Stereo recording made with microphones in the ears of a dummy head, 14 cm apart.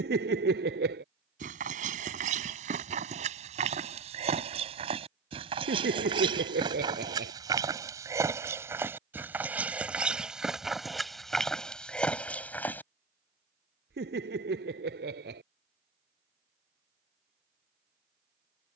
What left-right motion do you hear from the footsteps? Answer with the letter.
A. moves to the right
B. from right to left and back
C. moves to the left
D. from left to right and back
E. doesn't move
C.